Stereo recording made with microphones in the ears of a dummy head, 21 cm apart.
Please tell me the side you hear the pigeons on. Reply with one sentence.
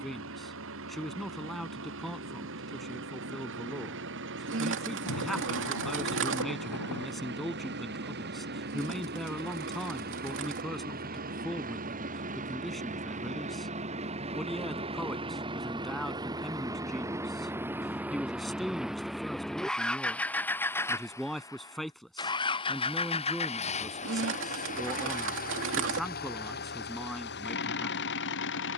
You can hear the pigeons on the right.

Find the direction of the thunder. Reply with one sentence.
In this clip you hear the thunder on the left.